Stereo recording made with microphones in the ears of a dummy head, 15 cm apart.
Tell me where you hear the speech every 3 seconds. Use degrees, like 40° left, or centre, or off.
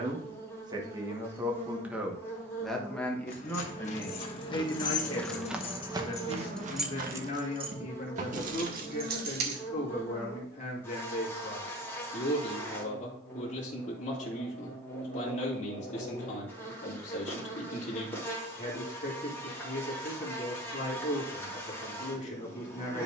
10° right, 20° left, 40° left, 40° left, 40° left, 40° left, 40° left, 40° left.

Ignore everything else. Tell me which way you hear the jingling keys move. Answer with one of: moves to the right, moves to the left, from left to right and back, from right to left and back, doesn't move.
moves to the right.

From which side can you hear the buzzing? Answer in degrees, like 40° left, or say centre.
10° left.